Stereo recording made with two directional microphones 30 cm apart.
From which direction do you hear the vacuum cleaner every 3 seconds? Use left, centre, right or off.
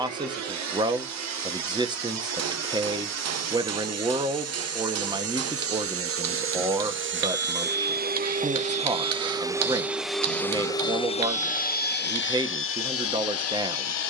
right, right, right, centre, left.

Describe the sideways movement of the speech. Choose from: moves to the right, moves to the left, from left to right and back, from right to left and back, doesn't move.
doesn't move.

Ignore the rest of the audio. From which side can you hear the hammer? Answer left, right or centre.
right.